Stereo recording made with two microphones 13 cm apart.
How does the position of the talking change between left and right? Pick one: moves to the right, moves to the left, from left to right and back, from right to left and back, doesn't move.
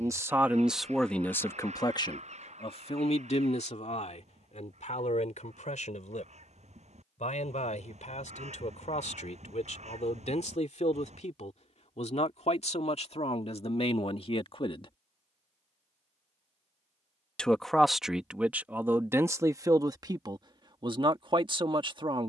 from right to left and back.